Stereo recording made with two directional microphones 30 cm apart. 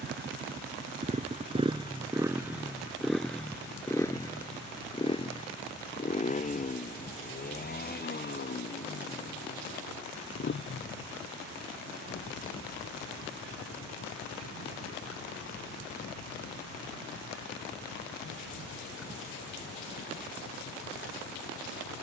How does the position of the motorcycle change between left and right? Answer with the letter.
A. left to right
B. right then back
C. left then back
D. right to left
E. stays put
D.